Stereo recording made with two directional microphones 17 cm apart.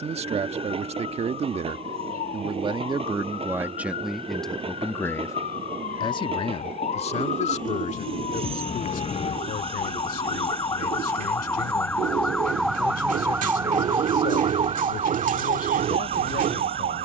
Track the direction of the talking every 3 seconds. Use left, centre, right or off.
right, centre, left, left, left, left.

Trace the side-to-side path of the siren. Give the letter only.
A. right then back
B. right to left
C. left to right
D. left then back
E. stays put
C.